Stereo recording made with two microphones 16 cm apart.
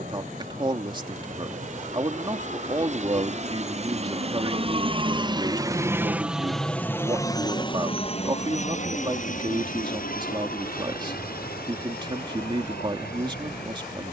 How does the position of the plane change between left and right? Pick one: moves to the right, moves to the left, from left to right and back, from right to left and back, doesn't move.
moves to the left.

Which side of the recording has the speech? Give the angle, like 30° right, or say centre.
30° right.